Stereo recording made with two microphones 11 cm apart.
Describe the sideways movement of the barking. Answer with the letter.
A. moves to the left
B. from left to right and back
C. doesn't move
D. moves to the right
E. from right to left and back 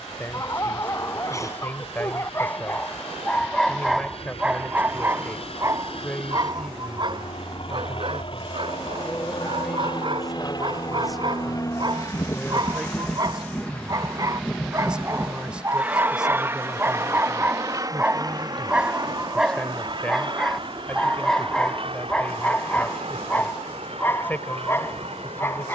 B.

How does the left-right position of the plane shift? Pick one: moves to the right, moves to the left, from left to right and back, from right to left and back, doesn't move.
moves to the right.